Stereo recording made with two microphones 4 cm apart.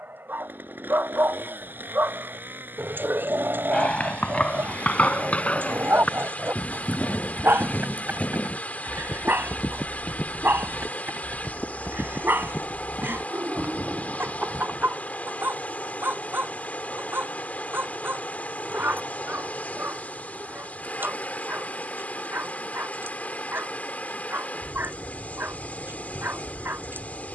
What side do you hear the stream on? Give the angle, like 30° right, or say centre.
40° left.